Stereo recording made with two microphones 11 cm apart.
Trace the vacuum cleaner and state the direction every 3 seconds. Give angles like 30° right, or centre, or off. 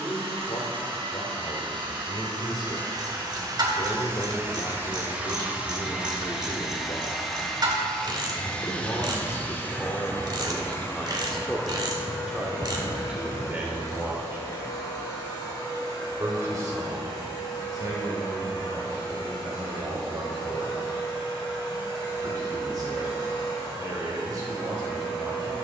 50° right, 20° right, centre, 20° left, 40° left, 50° left, 50° left, 50° left, 60° left.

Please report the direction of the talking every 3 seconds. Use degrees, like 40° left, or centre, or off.
50° left, 50° left, 40° left, 20° left, 10° right, 30° right, 40° right, 40° right, 40° right.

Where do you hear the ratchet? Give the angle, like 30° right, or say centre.
40° right.